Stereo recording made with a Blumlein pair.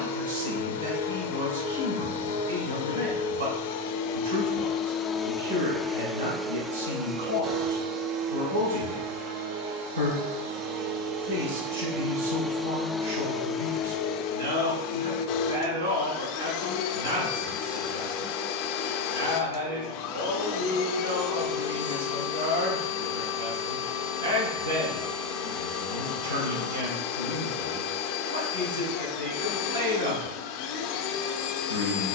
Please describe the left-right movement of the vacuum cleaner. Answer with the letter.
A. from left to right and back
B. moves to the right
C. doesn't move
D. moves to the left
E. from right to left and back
A.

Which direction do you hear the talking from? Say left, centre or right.
right.